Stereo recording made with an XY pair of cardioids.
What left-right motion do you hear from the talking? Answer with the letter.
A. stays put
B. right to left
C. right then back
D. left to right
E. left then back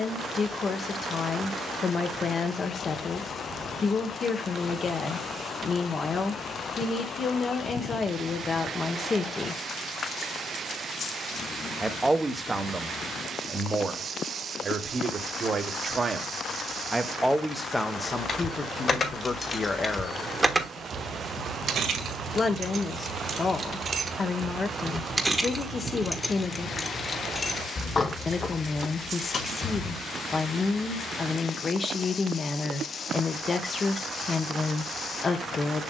C.